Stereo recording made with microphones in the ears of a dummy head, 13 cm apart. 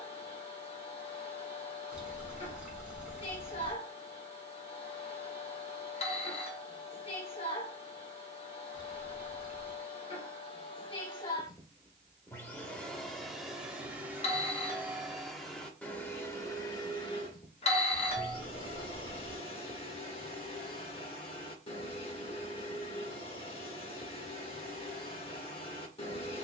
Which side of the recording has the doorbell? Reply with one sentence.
In this clip you hear the doorbell on the left.